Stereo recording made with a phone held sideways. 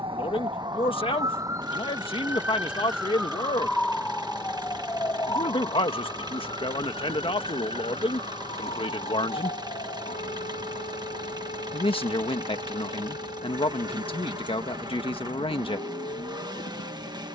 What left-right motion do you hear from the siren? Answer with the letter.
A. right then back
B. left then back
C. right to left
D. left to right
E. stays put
C.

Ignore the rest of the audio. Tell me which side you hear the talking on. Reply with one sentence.
In this clip you hear the talking on the left.